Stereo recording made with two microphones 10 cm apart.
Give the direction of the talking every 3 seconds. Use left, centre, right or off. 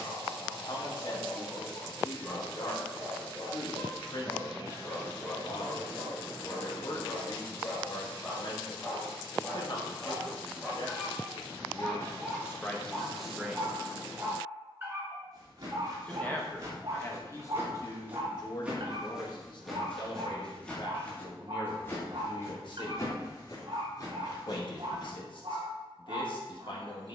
left, left, left, left, centre, left, left, left, left.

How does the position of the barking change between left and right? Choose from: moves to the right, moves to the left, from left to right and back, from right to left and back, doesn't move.
moves to the right.